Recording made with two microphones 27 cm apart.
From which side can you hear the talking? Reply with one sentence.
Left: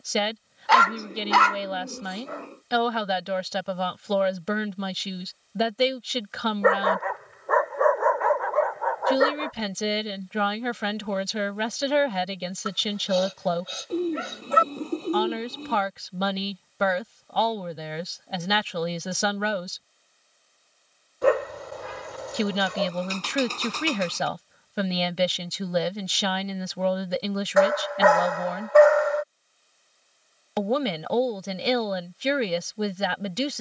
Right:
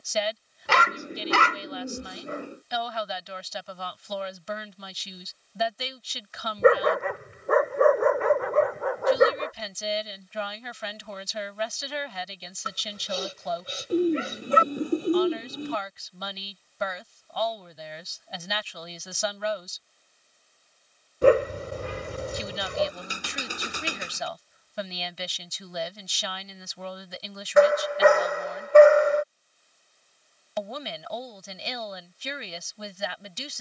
You can hear the talking on the left.